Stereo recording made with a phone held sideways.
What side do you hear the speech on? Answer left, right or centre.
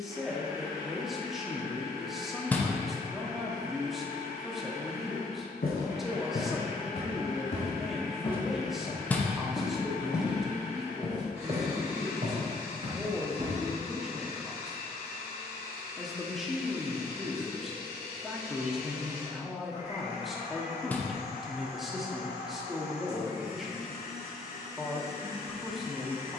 centre.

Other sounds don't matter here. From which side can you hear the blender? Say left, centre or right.
left.